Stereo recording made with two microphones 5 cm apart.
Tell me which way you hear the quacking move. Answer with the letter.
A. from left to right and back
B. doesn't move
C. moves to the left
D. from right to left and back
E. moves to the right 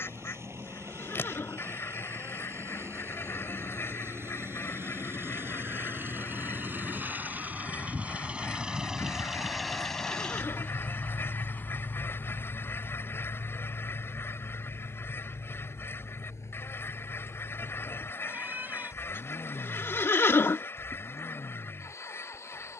B.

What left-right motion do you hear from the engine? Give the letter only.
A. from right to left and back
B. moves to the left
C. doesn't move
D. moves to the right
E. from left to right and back
B.